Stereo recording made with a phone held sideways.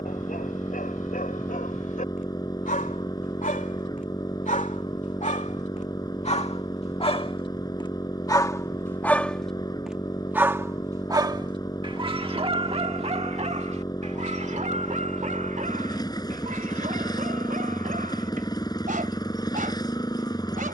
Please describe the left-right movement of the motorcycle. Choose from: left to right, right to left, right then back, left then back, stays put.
stays put.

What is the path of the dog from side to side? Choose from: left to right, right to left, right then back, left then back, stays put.
left to right.